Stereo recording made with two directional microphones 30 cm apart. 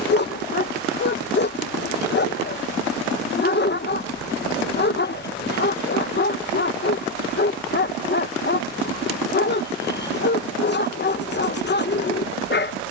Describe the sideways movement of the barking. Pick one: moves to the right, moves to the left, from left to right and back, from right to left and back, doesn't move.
doesn't move.